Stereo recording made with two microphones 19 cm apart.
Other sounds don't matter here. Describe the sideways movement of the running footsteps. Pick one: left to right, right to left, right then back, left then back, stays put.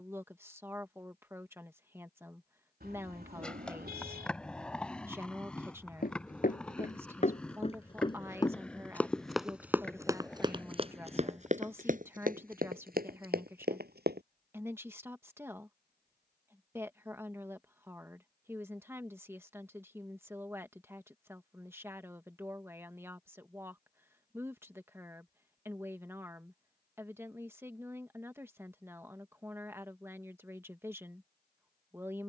left to right.